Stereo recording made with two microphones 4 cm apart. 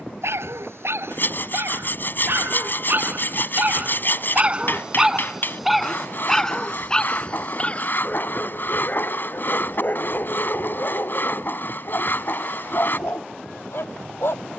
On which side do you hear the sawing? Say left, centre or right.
left.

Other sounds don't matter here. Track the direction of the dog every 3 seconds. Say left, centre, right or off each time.
right, right, left, left, left.